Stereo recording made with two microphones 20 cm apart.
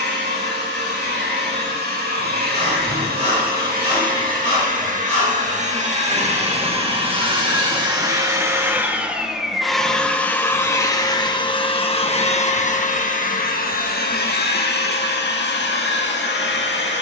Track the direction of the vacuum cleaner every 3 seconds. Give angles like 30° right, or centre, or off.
50° right, 40° right, 20° right, 10° left, 40° left, 60° left.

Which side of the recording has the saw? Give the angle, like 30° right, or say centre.
30° right.